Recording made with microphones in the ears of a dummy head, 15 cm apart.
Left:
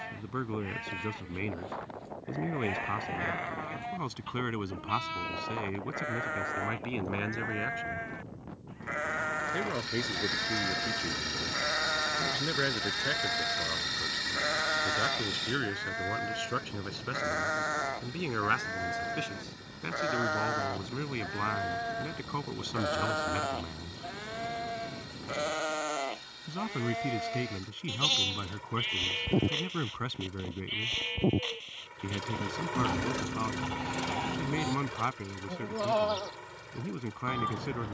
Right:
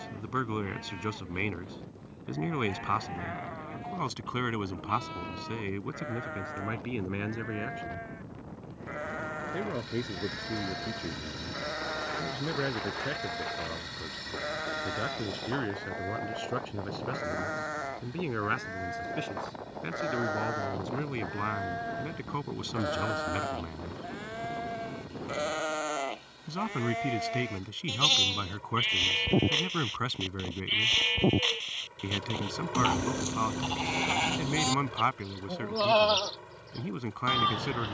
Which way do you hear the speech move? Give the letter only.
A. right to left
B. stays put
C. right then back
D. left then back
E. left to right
D.